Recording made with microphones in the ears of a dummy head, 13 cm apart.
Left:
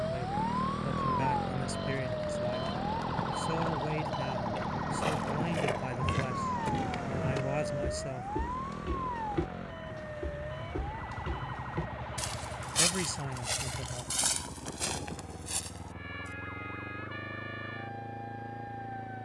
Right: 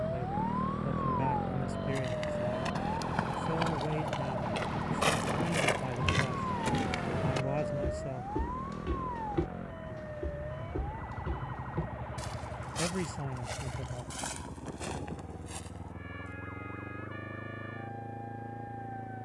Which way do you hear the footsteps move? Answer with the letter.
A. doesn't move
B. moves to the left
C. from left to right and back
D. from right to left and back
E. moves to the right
B.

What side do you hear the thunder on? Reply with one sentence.
You can hear the thunder on the right.